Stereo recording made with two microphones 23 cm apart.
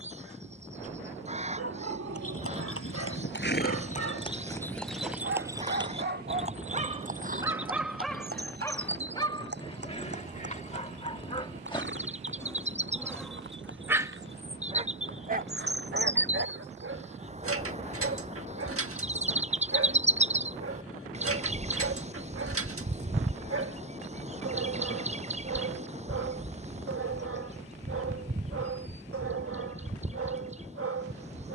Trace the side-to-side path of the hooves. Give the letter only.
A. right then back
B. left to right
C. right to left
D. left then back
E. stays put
B.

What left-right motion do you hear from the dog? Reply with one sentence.
You can hear the dog go left and come back.